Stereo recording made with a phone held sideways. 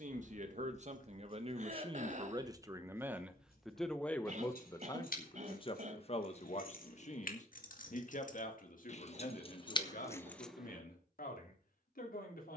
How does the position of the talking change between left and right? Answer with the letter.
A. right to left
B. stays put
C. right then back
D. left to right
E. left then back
A.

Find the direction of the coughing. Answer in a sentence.
You can hear the coughing on the right.